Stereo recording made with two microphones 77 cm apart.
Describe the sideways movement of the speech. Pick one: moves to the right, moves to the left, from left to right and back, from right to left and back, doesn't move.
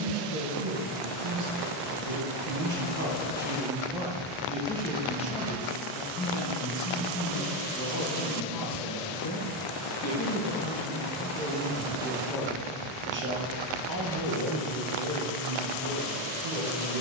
from right to left and back.